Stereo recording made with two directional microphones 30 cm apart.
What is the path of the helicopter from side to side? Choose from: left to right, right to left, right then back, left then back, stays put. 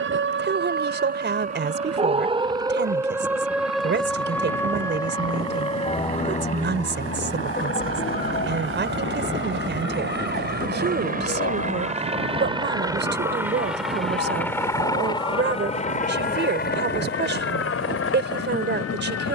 right to left.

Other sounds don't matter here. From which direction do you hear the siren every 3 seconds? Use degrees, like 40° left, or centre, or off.
20° right, 10° left, 30° left, 40° left, 50° left, 50° left, 50° left.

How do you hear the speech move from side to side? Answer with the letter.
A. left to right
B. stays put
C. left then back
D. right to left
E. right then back
B.